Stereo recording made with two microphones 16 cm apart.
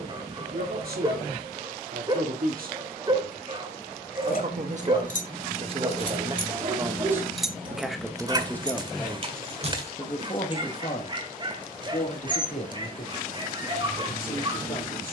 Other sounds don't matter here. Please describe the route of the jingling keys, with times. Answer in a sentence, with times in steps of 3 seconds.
In this clip you hear the jingling keys not at all from 0 s, on the left from 3 s, in the centre from 6 s, on the right from 9 s and not at all from 12 s.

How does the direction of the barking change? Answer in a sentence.
You can hear the barking stay put.